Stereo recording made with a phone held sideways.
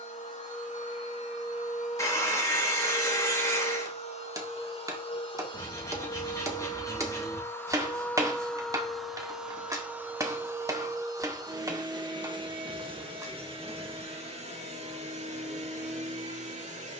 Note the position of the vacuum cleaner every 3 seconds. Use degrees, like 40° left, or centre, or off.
60° left, 50° left, 20° left, 20° right, 40° right, 60° right.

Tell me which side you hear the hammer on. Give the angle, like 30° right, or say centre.
20° right.